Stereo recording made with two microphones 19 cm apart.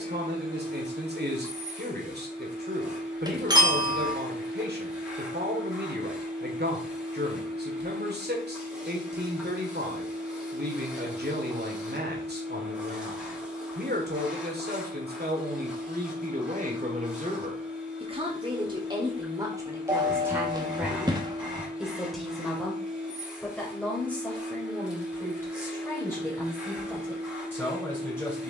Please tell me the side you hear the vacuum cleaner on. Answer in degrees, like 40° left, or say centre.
10° right.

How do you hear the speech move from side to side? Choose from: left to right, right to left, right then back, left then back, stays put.
right to left.